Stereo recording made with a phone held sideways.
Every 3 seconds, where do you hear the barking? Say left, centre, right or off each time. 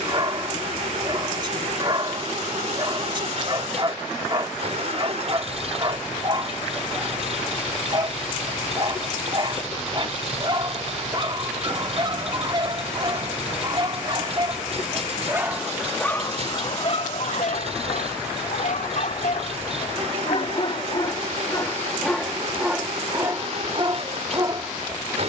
right, right, right, right, right, left, left, centre, right.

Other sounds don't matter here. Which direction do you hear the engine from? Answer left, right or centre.
right.